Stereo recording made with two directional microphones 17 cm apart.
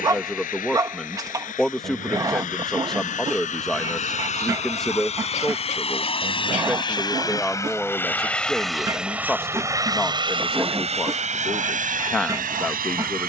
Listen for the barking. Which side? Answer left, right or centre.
right.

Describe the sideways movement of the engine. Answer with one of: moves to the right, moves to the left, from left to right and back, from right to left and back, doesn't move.
moves to the right.